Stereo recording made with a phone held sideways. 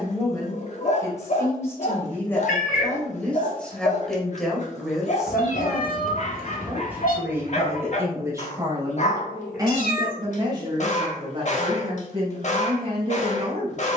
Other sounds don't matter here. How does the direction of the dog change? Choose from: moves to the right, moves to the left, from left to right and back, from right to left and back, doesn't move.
doesn't move.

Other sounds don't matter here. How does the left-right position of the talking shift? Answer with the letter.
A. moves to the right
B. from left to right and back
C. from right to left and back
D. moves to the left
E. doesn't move
A.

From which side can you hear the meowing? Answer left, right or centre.
left.